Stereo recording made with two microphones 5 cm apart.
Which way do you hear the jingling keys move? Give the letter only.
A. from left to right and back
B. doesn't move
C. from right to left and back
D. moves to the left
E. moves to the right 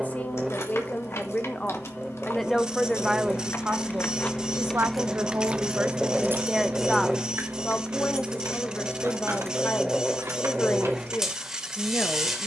E.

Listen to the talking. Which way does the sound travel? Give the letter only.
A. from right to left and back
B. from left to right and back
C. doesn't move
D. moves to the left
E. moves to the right
B.